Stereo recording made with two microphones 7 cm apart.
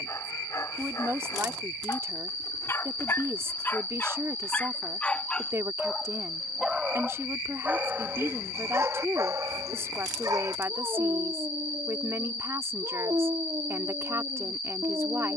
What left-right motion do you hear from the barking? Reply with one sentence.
In this clip you hear the barking travel towards the right.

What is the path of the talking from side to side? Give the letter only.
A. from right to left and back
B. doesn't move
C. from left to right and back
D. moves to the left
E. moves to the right
B.